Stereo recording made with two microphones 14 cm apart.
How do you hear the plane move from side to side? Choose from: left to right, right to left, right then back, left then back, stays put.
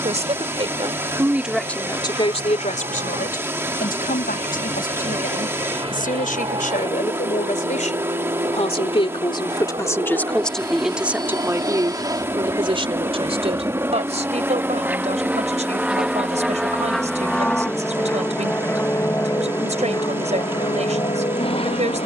right to left.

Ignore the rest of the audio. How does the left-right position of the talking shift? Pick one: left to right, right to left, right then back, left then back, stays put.
left then back.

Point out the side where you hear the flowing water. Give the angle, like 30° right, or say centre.
20° right.